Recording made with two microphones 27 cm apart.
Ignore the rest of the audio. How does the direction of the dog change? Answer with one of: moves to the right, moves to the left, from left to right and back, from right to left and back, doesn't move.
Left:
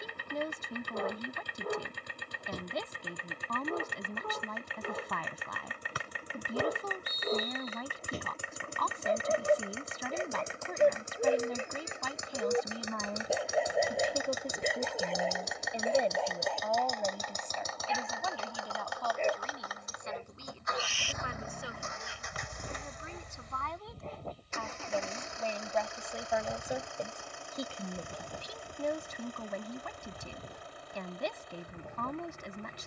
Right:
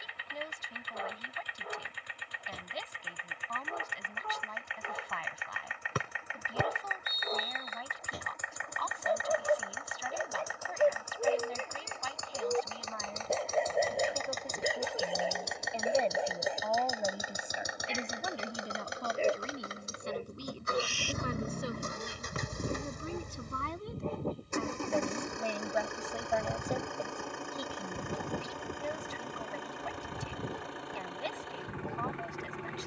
moves to the right.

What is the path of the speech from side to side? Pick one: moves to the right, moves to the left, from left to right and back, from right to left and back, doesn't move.
from left to right and back.